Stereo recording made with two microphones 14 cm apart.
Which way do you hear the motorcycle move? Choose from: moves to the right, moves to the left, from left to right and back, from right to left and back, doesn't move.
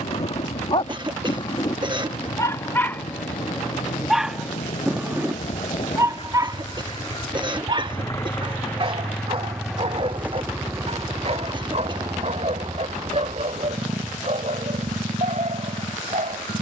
moves to the right.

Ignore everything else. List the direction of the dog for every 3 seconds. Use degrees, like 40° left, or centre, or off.
30° left, centre, 30° right, 50° right, 50° right, 60° right.